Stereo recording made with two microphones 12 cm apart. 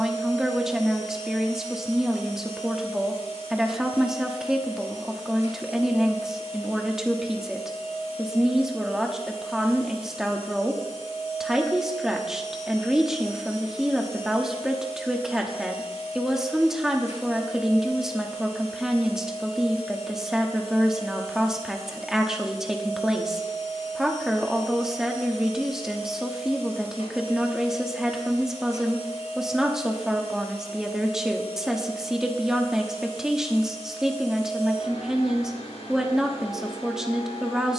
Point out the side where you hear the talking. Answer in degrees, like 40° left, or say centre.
centre.